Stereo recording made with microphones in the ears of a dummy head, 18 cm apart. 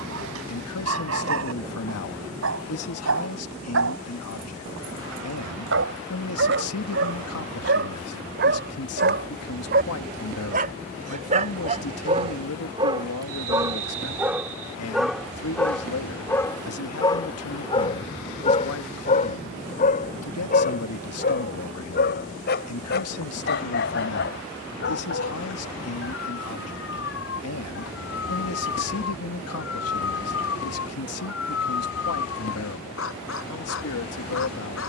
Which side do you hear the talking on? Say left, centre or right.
left.